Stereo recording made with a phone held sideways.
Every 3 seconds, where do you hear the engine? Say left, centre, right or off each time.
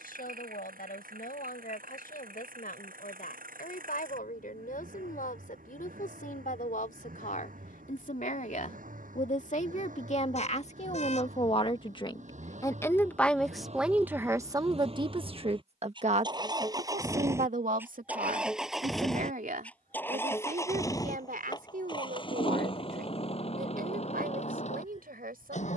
right, right, right, right, right, right, centre, left, left.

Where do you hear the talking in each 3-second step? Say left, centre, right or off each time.
left, left, left, left, centre, right, right, right, right.